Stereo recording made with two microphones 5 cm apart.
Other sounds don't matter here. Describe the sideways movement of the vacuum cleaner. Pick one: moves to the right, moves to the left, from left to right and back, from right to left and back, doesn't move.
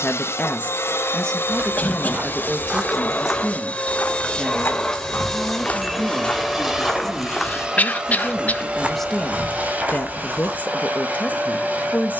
moves to the right.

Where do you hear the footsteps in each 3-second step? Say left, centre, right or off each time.
right, left, centre, right.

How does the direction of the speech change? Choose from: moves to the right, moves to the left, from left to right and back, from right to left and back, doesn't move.
from left to right and back.